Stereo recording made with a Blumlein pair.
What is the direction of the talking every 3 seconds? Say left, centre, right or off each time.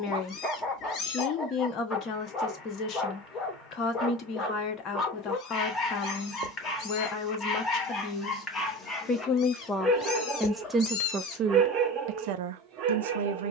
left, left, left, centre, right.